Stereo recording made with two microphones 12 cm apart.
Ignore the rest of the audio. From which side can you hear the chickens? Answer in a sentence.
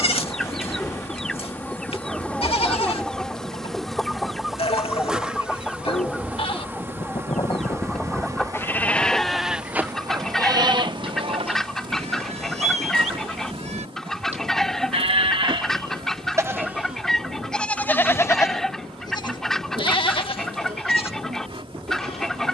In this clip you hear the chickens in the centre.